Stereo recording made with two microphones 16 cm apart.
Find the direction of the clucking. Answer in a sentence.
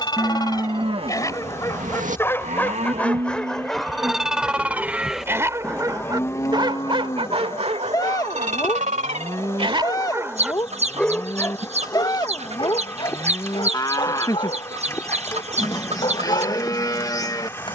You can hear the clucking on the right.